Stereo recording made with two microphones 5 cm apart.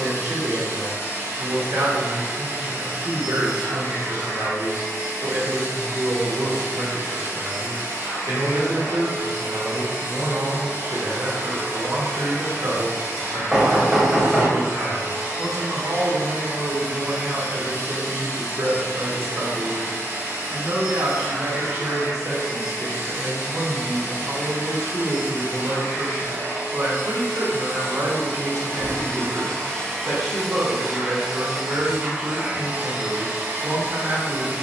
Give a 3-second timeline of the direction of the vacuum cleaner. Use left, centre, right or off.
left, left, left, left, left, left, left, left, left, left, centre, right.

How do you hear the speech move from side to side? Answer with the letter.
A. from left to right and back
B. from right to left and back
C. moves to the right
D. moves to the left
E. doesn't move
E.